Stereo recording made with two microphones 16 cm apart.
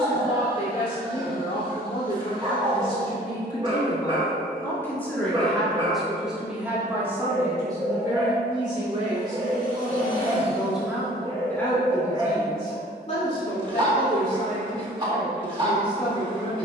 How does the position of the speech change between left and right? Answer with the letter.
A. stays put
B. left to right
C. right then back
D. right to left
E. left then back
C.